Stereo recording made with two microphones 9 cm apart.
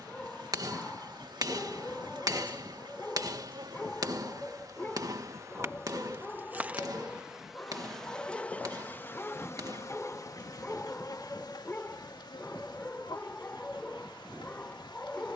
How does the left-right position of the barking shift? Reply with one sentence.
In this clip you hear the barking stay in one place.